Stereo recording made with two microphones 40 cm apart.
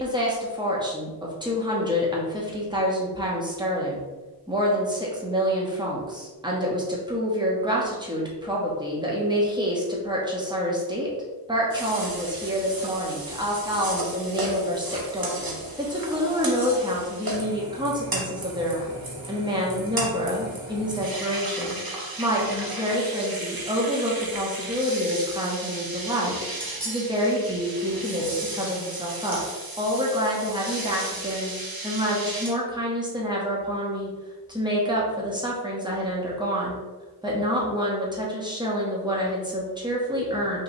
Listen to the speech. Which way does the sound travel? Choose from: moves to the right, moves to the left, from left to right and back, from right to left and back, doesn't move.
doesn't move.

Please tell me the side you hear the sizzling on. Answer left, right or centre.
right.